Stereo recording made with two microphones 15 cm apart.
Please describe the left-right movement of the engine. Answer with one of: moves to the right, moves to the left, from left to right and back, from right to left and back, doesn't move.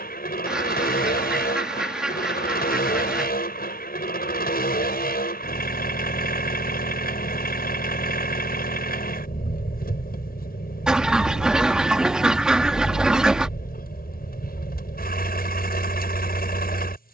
doesn't move.